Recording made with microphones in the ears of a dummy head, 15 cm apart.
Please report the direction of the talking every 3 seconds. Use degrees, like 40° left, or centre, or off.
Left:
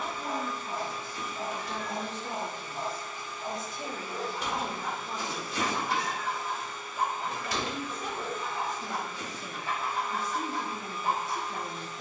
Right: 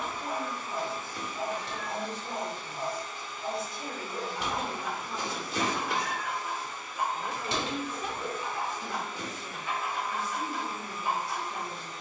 50° left, 30° left, centre, 40° left.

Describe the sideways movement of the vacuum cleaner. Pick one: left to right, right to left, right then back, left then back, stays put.
stays put.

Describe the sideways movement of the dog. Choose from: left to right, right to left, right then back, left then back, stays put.
stays put.